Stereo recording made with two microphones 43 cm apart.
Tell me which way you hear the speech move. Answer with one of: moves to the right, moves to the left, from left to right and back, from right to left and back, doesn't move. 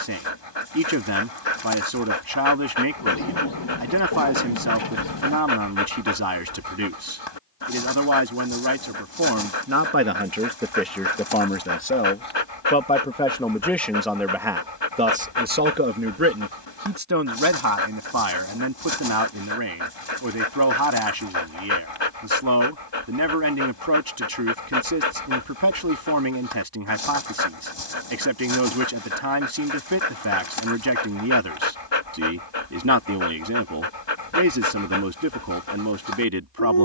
from right to left and back.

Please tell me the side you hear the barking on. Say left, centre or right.
left.